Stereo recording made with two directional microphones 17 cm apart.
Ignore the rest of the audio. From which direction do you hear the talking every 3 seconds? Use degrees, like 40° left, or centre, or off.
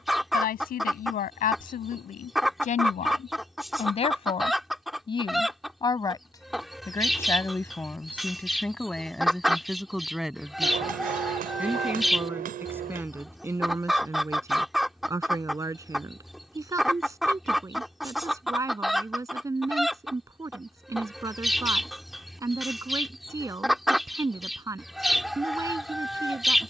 50° left, 30° left, 10° left, centre, 10° right, 20° right, 20° right, 20° right, 20° right.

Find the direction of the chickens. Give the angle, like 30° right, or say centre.
centre.